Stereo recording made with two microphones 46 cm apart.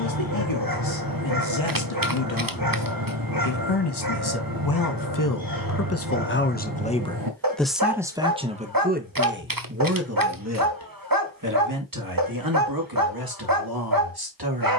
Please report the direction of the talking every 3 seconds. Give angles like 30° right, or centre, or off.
70° left, 50° left, centre, 30° right, 50° right.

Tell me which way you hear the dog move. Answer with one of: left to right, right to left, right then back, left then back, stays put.
stays put.